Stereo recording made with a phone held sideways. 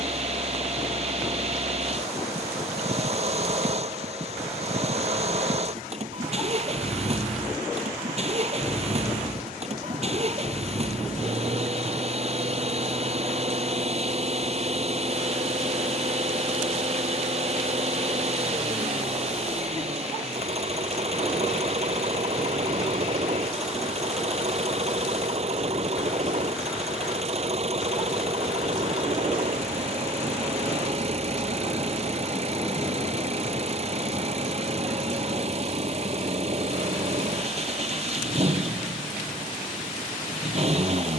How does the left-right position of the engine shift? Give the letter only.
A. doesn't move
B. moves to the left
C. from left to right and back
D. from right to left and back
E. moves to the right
A.